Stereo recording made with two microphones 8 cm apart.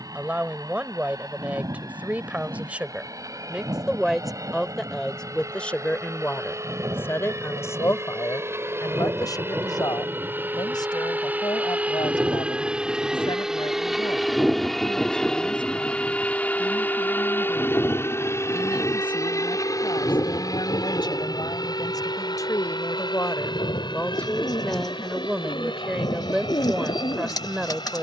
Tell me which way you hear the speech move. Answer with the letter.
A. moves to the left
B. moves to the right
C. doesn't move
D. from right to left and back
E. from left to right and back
D.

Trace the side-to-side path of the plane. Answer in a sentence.
You can hear the plane move from right to left.